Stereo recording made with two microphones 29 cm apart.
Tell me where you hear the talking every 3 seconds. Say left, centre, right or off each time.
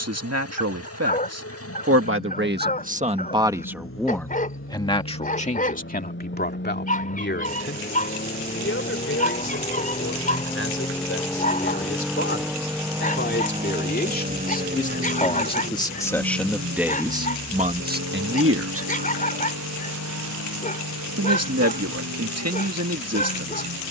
right, centre, left, left, left, centre, right, right.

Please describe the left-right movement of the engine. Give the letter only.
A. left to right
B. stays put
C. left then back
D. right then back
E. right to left
A.